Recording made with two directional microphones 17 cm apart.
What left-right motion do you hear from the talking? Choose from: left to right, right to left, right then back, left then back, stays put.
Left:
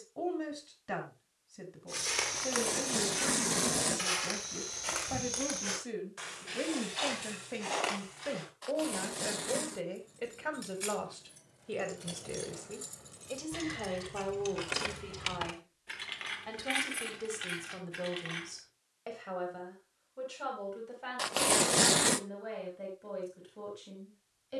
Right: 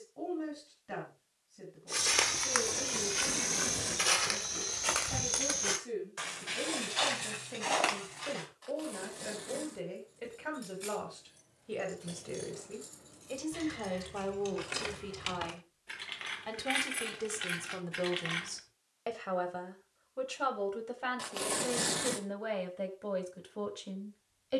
left to right.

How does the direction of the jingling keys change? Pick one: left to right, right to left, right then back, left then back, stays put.
left to right.